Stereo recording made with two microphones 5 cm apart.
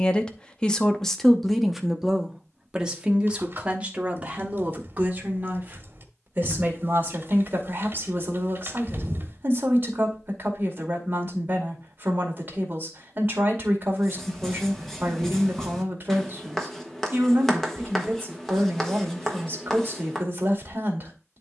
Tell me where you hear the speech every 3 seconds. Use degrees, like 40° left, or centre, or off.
centre, 30° right, 40° right, 40° right, 40° right, 40° right, 40° right.